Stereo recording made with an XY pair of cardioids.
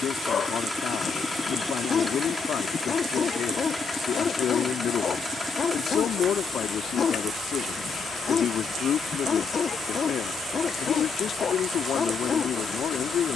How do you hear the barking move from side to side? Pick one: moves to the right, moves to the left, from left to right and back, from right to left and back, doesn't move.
doesn't move.